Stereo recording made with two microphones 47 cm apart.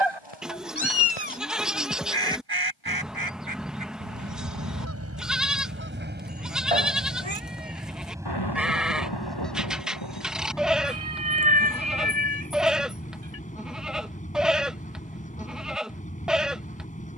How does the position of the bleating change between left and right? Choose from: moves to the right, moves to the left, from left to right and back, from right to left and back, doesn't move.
doesn't move.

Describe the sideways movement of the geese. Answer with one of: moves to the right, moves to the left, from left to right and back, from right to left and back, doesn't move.
moves to the left.